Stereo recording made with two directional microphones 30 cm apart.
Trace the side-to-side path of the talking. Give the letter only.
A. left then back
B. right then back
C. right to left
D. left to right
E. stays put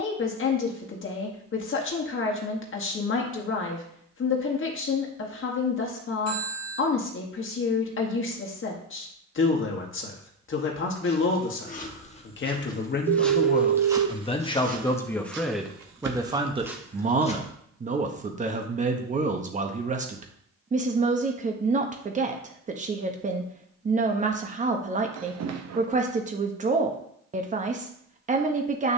D.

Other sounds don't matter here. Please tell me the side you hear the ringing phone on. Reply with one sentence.
You can hear the ringing phone on the right.